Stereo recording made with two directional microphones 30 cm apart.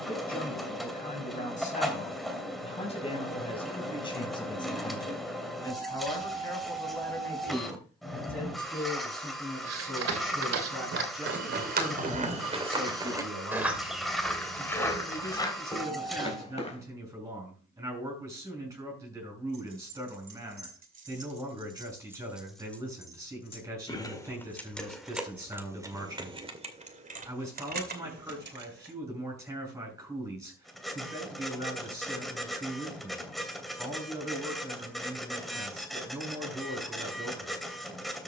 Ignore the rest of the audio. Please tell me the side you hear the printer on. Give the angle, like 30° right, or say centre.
centre.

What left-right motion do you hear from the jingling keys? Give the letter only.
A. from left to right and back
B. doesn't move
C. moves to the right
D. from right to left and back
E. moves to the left
D.